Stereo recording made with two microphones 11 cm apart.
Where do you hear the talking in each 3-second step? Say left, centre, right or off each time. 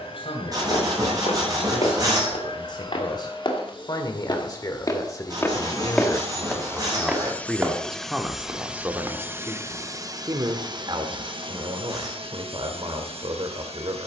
left, left, centre, right, right.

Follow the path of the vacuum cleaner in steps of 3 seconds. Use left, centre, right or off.
left, left, centre, right, right.